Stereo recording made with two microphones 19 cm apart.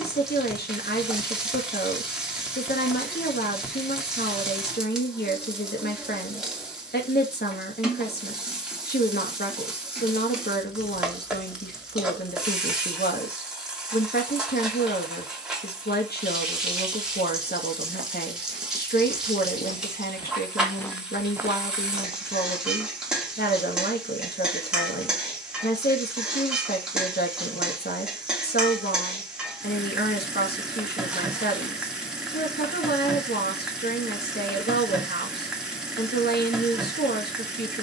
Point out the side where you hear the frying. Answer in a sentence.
You can hear the frying in the centre.